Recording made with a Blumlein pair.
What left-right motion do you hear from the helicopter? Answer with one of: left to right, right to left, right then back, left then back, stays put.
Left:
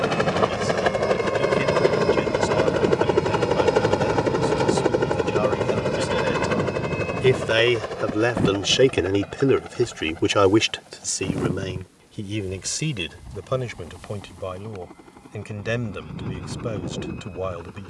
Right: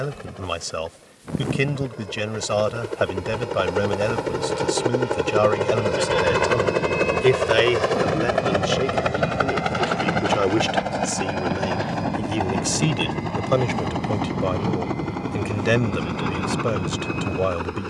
left to right.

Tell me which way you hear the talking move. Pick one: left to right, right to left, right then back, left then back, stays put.
left then back.